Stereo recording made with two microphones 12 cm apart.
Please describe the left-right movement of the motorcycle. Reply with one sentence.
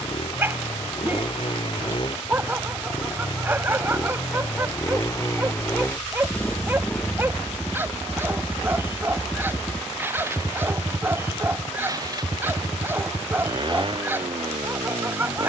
You can hear the motorcycle move from left to right.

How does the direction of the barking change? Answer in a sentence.
You can hear the barking stay in one place.